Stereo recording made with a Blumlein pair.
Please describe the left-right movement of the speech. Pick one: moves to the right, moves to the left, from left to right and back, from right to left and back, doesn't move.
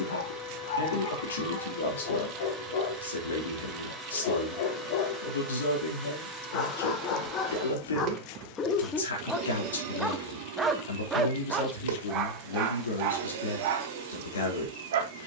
doesn't move.